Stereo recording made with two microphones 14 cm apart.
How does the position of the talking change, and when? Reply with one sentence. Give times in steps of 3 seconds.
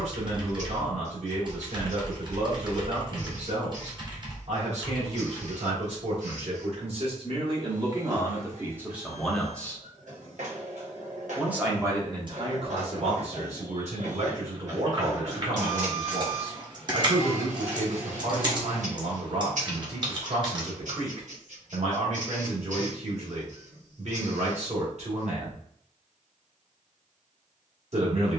In this clip you hear the talking on the right from 0 s, in the centre from 9 s and on the right from 12 s.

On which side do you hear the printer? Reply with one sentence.
In this clip you hear the printer on the right.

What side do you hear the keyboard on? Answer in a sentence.
You can hear the keyboard on the right.